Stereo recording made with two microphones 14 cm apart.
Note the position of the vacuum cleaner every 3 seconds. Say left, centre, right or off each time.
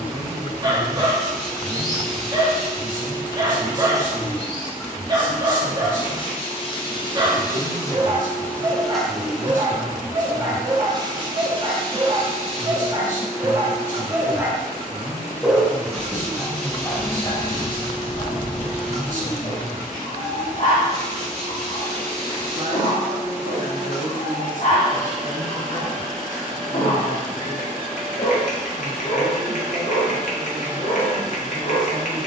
right, centre, left, right, right, right, right, right, right, right, right.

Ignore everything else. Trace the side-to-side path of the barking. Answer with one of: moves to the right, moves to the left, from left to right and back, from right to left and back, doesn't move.
moves to the left.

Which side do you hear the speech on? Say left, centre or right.
right.